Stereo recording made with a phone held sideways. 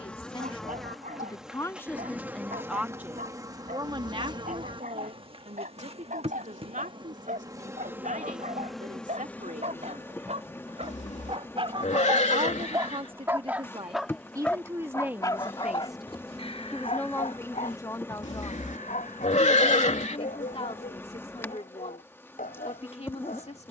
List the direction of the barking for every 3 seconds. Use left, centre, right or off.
right, right, right, right, centre, left, left, left.